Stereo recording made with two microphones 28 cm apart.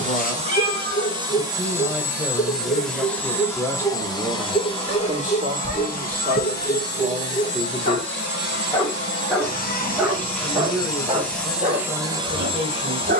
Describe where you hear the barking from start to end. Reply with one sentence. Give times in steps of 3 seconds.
In this clip you hear the barking on the left from 0 s, in the centre from 9 s and on the right from 12 s.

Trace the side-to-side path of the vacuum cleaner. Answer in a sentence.
You can hear the vacuum cleaner go left and come back.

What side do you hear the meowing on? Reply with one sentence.
You can hear the meowing on the left.